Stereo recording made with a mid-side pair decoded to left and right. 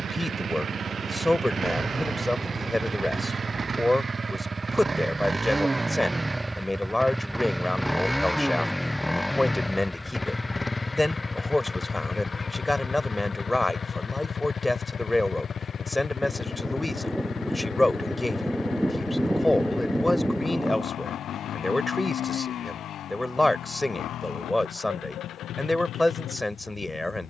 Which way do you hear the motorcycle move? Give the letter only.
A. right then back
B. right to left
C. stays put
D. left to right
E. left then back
B.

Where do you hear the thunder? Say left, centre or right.
centre.